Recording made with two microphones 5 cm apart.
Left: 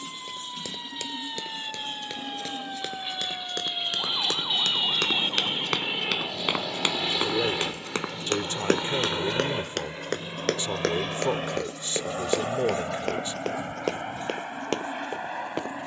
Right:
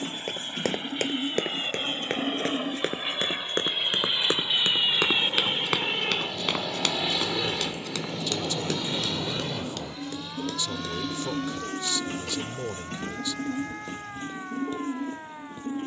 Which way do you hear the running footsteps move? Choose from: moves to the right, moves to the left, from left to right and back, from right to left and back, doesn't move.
moves to the left.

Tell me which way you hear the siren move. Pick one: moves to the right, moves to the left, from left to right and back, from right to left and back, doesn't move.
moves to the right.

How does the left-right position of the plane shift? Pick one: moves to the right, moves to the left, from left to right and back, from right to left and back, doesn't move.
moves to the left.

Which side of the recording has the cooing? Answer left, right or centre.
right.